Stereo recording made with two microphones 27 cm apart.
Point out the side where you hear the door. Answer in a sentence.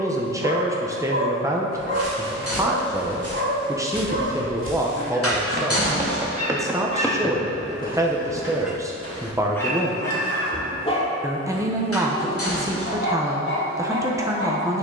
In this clip you hear the door on the left.